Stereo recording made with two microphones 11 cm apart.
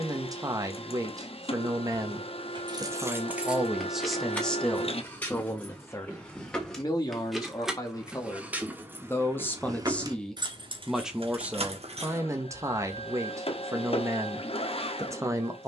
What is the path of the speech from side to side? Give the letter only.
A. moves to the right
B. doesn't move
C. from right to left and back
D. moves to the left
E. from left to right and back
C.